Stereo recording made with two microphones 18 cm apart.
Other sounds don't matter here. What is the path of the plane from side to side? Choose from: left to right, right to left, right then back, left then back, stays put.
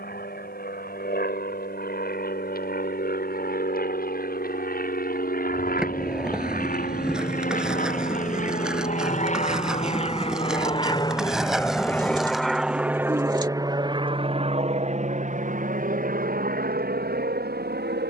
left to right.